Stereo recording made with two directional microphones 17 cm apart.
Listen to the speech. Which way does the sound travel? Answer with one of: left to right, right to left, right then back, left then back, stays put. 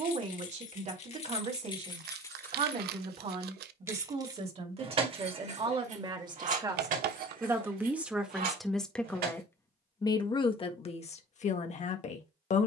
right to left.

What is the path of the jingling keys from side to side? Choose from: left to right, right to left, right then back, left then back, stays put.
left to right.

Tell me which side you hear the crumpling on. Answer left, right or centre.
right.